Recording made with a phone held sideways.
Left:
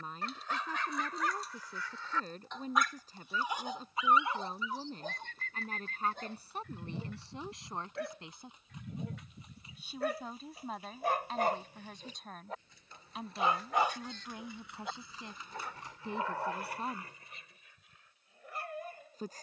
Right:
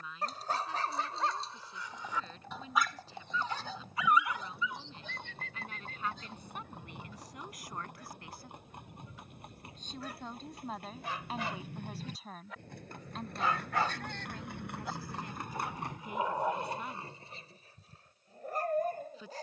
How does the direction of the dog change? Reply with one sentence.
In this clip you hear the dog go left and come back.